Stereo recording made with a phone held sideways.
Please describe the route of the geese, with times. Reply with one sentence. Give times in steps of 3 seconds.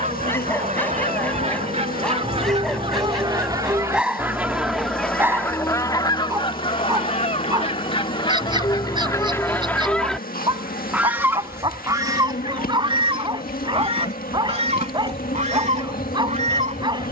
In this clip you hear the geese on the right from 0 s, in the centre from 3 s, on the left from 6 s, in the centre from 9 s and on the right from 12 s.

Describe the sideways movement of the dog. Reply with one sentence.
You can hear the dog move from left to right.